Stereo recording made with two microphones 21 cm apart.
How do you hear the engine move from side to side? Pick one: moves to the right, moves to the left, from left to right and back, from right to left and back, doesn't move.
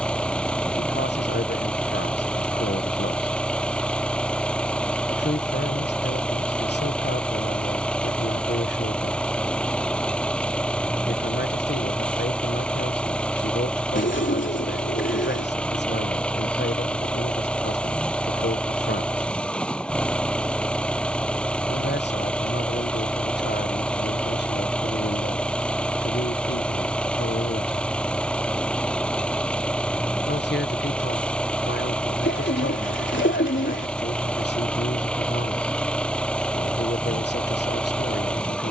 doesn't move.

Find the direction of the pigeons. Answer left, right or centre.
left.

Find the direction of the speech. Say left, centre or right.
left.